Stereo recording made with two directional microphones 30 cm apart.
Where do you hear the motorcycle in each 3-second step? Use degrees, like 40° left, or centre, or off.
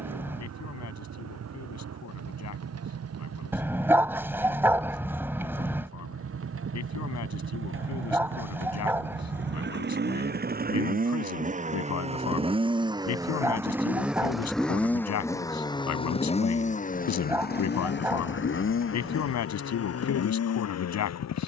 60° right, 50° right, 40° right, 30° right, 10° right, 20° left, 50° left.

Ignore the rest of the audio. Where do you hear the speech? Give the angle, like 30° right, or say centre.
60° left.